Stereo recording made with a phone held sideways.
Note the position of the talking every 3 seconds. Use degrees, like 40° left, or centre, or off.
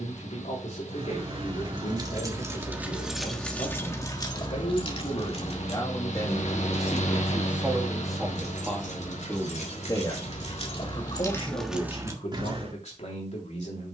60° left, 50° left, centre, 30° left, 60° left.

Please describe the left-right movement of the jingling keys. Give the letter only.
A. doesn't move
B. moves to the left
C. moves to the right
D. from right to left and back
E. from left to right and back
D.